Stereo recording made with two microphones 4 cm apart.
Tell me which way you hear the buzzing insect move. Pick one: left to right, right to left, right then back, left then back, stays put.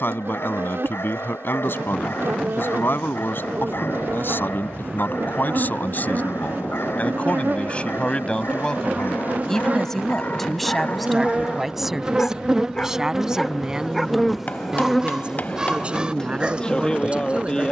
right to left.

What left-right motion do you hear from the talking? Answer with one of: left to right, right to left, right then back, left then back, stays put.
left to right.